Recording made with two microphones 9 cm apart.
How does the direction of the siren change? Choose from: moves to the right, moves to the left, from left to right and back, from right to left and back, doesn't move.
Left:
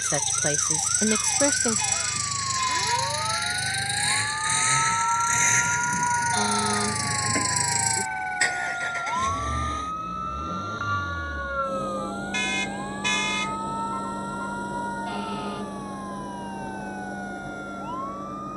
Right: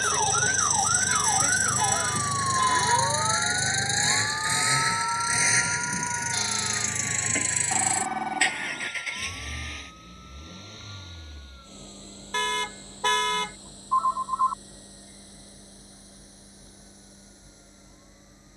moves to the left.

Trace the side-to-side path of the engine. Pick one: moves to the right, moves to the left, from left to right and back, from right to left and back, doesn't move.
moves to the left.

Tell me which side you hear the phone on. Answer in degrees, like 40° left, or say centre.
60° right.